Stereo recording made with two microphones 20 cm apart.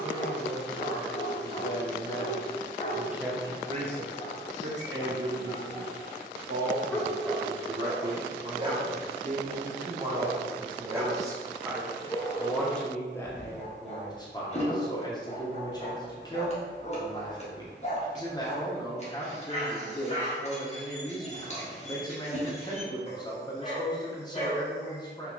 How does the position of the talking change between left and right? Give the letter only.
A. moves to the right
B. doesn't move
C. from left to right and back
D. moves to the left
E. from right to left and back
C.